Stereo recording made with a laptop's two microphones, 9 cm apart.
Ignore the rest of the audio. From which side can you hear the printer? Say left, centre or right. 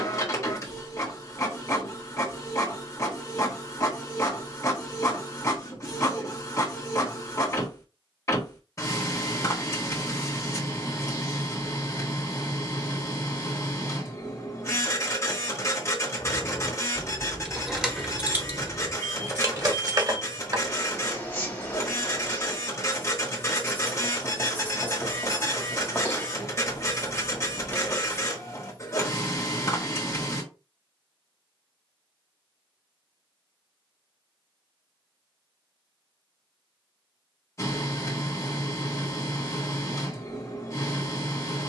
left.